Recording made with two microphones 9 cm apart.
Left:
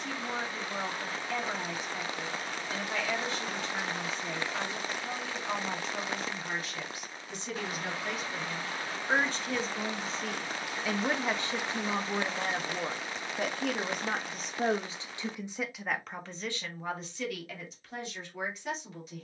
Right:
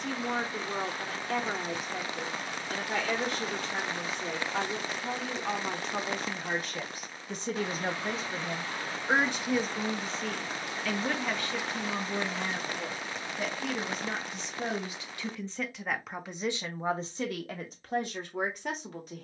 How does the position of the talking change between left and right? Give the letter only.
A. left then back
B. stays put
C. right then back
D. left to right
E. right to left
A.